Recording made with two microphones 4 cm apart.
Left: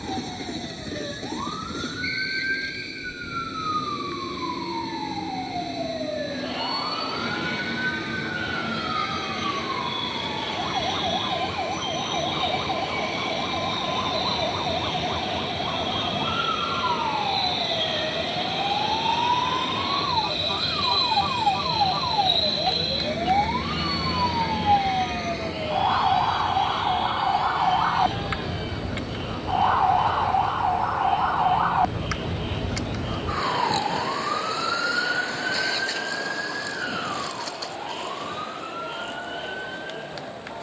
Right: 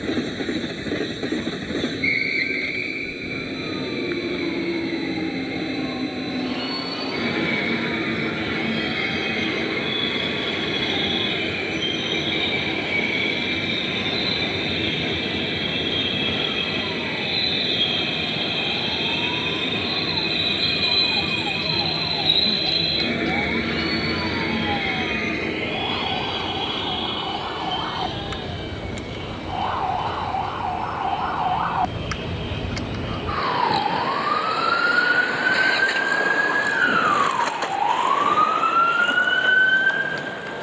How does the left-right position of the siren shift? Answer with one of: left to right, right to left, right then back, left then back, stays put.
left to right.